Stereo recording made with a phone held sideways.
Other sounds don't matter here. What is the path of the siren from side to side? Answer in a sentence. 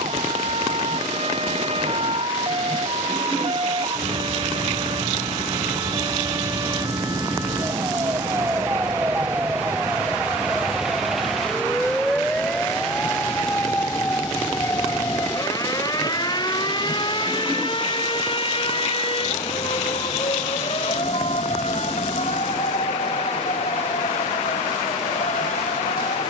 In this clip you hear the siren move from right to left.